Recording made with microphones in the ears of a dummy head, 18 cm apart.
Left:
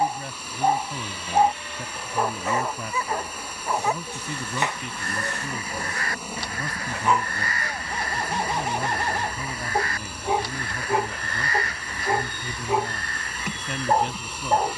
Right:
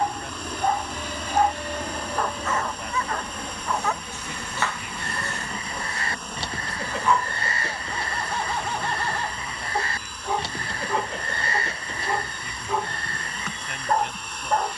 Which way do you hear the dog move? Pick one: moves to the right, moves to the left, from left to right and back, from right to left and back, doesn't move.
doesn't move.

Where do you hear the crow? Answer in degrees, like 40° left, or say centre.
20° right.